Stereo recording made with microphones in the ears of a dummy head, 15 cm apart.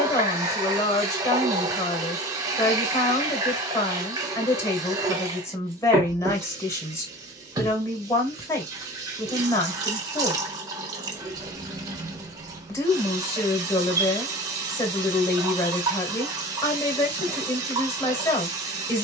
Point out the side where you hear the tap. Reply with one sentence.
In this clip you hear the tap on the right.